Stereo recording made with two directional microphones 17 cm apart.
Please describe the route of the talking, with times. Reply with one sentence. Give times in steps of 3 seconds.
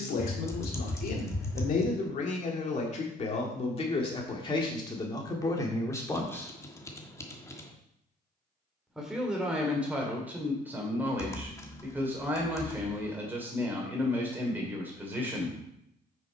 You can hear the talking on the left from 0 s and in the centre from 6 s.